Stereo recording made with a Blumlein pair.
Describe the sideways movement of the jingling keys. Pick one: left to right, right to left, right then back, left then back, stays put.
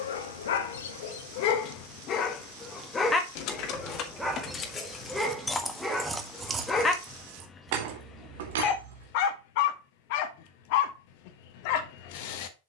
left to right.